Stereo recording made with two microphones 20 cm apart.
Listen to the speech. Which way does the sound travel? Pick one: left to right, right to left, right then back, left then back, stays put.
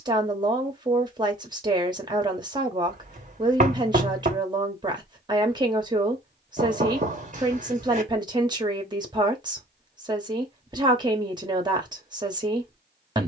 stays put.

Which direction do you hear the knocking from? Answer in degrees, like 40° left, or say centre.
40° right.